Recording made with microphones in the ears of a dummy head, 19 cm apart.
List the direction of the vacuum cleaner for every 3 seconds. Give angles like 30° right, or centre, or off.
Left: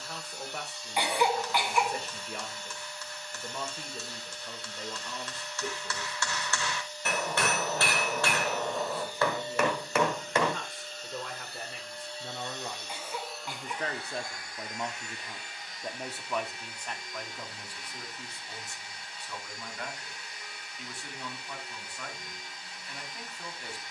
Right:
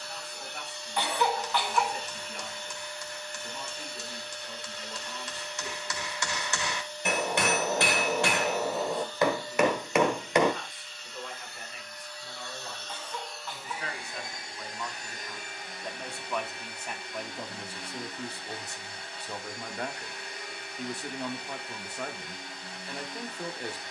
50° right, 50° right, 30° right, 30° left, centre, 40° right, 50° right, 50° right.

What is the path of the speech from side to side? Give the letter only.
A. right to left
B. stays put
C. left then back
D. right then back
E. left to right
E.